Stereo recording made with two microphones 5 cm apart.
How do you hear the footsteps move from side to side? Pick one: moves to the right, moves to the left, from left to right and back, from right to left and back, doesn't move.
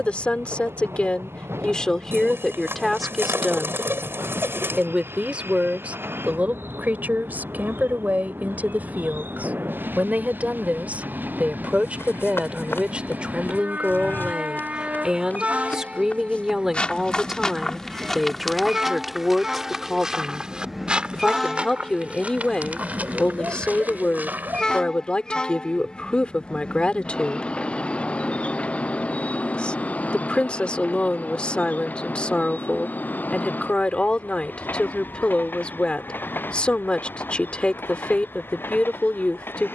moves to the right.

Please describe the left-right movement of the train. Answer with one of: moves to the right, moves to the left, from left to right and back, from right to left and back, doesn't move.
moves to the left.